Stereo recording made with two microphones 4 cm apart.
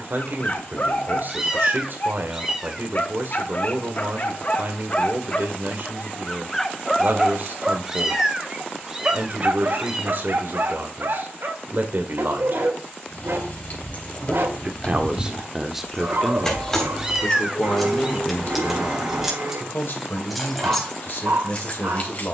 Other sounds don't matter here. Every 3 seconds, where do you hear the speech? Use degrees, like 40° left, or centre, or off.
50° right, 50° right, 50° right, 50° right, 40° right, 10° left, 50° left, 60° left.